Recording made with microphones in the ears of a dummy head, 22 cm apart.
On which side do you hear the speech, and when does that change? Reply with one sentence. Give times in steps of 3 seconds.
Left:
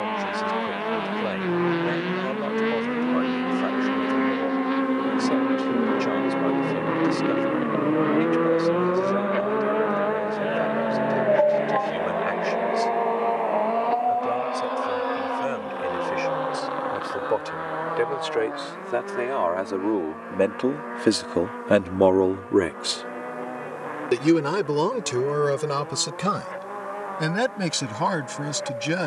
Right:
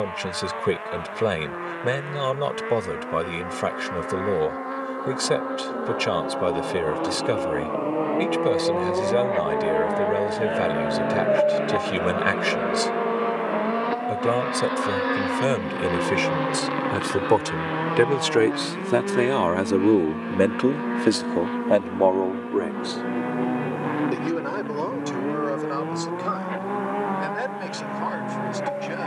In this clip you hear the speech on the right from 0 s and on the left from 21 s.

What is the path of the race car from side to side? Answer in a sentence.
In this clip you hear the race car move to the right.